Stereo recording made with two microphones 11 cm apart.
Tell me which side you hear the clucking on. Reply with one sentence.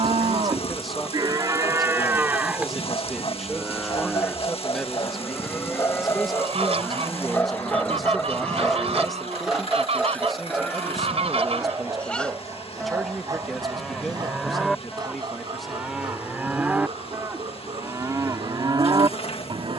In this clip you hear the clucking on the right.